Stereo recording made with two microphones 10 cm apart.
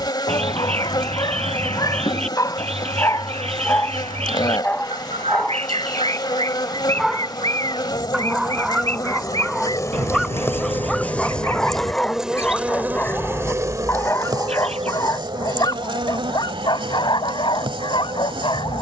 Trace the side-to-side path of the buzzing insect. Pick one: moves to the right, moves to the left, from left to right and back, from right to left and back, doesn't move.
moves to the right.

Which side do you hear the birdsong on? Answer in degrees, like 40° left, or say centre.
80° right.